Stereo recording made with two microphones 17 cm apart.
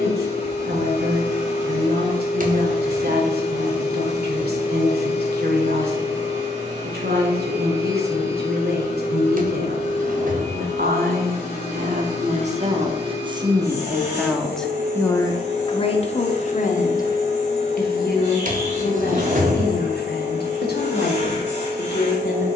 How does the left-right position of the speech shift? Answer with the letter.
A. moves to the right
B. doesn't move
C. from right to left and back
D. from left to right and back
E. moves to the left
E.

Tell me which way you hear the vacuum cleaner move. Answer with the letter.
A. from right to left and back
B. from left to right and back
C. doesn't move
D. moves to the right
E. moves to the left
C.